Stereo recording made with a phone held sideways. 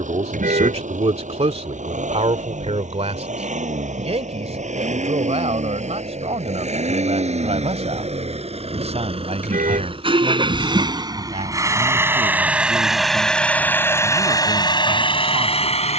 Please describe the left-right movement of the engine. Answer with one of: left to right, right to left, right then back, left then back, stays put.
right to left.